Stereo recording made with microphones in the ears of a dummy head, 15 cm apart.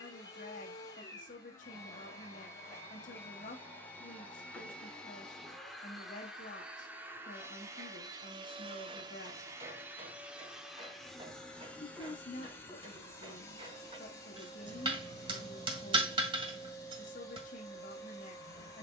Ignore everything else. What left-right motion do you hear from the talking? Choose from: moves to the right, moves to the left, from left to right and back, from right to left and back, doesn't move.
doesn't move.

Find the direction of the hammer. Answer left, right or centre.
right.